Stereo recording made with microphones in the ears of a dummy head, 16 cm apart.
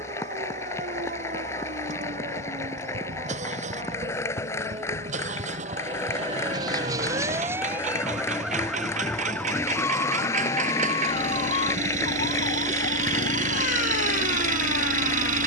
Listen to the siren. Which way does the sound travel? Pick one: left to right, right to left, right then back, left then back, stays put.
right to left.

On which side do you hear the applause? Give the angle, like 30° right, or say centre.
20° left.